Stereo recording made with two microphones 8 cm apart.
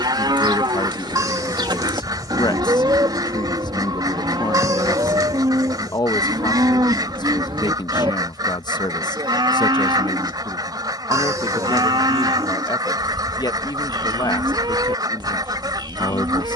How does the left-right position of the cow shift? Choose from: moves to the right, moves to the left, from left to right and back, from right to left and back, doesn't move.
doesn't move.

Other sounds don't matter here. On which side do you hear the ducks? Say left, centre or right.
right.